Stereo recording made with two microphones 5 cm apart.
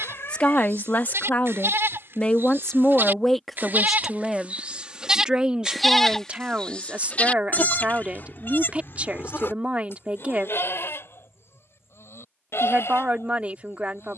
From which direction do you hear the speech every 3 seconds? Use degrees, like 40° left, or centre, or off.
30° left, 10° right, 30° right, 30° right, 30° right.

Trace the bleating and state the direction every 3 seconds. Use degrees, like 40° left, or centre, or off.
60° right, 30° right, 30° left, 60° left, 70° left.